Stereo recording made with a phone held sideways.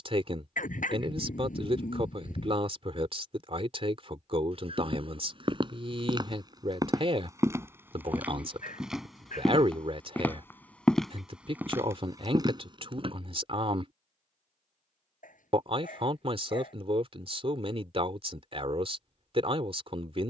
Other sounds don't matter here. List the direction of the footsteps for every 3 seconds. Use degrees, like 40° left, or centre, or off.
off, 40° right, 20° right, centre, 30° right, off, off.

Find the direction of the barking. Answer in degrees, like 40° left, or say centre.
80° left.